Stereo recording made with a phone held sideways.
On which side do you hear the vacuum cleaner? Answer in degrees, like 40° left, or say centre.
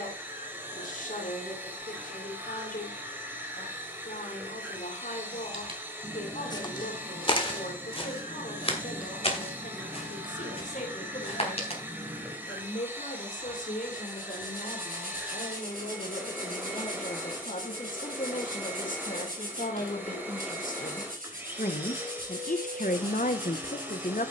10° right.